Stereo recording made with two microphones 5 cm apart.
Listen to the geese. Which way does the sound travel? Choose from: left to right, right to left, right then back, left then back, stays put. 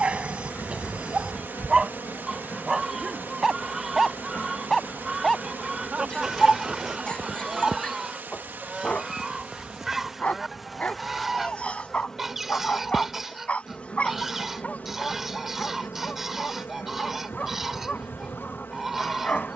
stays put.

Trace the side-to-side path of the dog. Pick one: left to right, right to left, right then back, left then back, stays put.
right to left.